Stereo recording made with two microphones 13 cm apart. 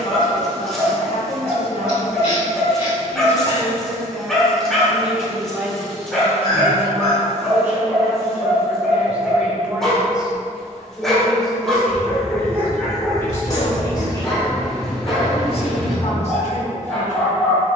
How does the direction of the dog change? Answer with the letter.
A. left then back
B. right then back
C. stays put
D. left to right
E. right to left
C.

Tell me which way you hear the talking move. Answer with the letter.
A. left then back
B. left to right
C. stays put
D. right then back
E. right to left
D.